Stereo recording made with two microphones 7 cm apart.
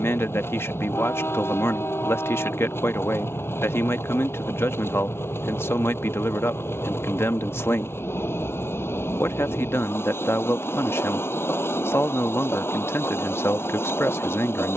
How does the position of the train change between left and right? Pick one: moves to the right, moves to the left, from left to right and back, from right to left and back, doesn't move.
doesn't move.